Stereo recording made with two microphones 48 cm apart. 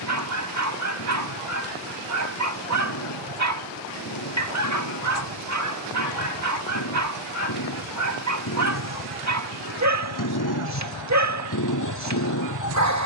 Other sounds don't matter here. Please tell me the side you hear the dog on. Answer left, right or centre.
right.